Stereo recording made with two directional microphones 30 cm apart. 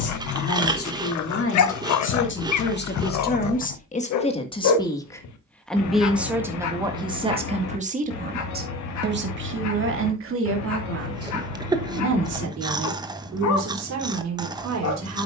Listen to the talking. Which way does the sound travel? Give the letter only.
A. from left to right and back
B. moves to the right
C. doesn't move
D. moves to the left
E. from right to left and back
B.